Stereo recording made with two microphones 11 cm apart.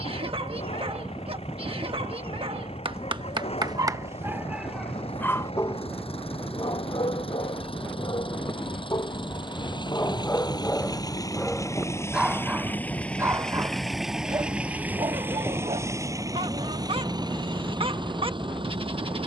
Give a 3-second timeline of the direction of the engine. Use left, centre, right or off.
left, left, left, left, centre, right, right.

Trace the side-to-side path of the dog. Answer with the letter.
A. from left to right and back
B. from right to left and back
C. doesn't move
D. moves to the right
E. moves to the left
B.